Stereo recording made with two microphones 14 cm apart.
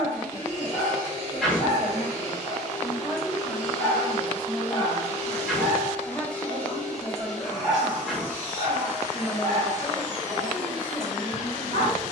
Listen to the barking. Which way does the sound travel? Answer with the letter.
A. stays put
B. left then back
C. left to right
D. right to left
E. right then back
C.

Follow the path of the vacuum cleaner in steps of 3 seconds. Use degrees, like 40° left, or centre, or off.
30° left, 20° left, centre, 30° right.